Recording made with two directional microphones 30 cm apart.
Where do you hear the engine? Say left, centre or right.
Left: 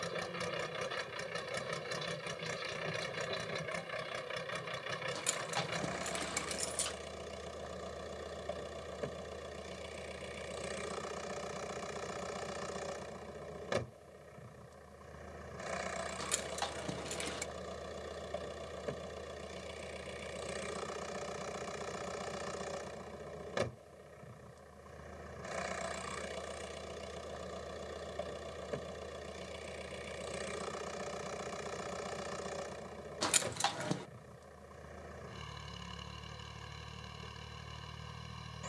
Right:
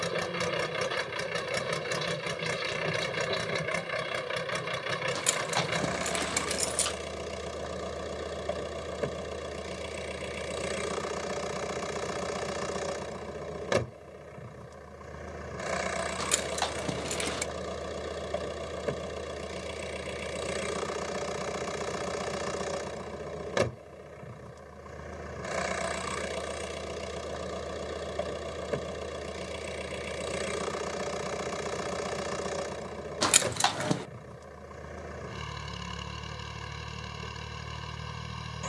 right.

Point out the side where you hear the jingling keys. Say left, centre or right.
right.